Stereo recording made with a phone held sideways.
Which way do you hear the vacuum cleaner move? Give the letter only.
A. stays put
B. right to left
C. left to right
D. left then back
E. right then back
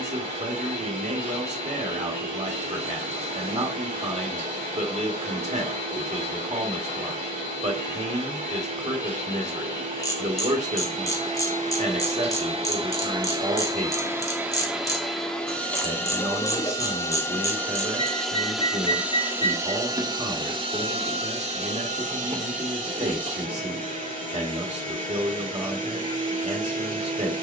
D.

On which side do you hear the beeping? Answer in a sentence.
In this clip you hear the beeping on the right.